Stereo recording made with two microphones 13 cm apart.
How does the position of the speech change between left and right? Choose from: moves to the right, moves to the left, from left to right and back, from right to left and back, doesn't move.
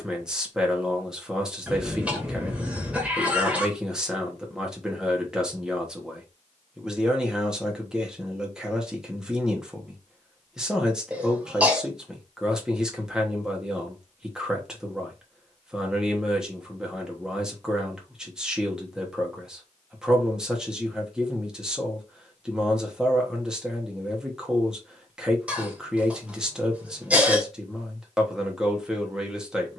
doesn't move.